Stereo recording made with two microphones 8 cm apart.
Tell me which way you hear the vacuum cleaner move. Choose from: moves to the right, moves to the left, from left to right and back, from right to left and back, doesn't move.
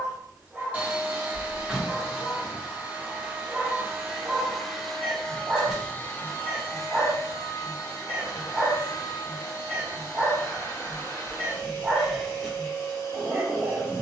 moves to the left.